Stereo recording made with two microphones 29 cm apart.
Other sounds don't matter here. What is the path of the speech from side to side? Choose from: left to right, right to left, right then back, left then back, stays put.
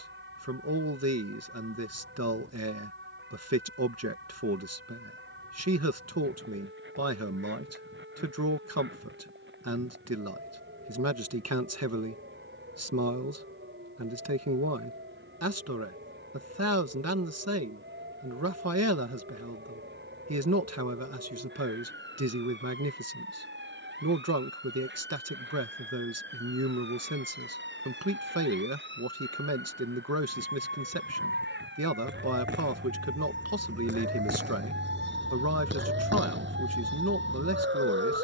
stays put.